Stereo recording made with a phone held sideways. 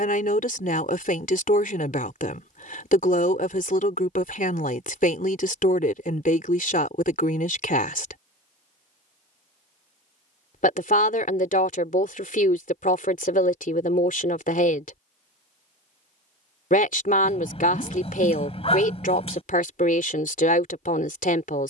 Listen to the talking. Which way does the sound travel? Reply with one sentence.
You can hear the talking stay put.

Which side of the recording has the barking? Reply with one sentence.
In this clip you hear the barking on the left.